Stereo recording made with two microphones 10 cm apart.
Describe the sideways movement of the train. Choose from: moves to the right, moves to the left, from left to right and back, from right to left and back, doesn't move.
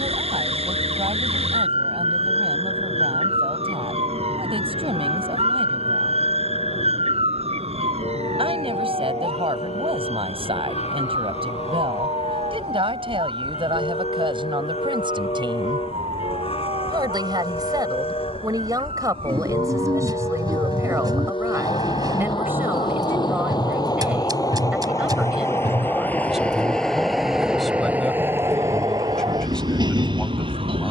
moves to the right.